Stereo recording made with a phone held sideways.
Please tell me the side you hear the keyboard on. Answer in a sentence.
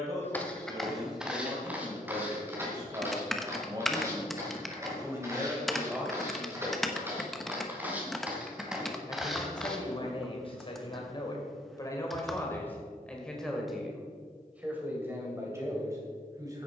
In this clip you hear the keyboard in the centre.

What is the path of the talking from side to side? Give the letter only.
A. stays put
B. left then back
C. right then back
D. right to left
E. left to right
B.